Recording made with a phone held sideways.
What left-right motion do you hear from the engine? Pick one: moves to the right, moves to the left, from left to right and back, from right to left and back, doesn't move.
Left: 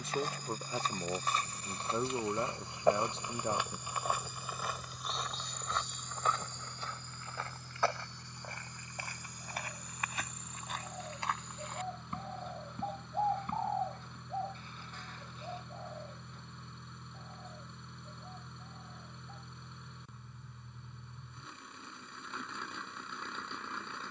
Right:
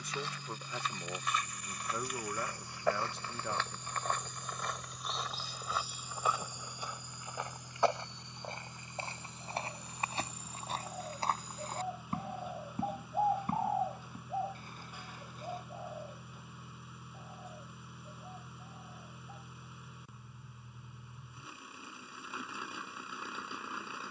doesn't move.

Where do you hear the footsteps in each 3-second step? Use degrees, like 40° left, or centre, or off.
30° left, 10° left, 20° right, 30° right, 40° right, 40° right, off, off.